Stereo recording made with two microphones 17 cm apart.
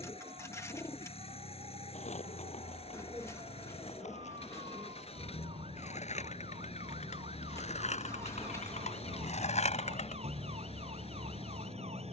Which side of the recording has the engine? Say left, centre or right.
left.